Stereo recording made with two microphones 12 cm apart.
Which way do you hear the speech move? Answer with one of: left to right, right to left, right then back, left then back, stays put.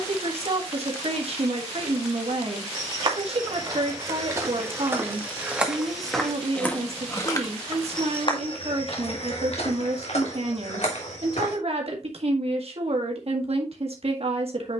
stays put.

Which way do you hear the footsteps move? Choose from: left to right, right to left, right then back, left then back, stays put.
right to left.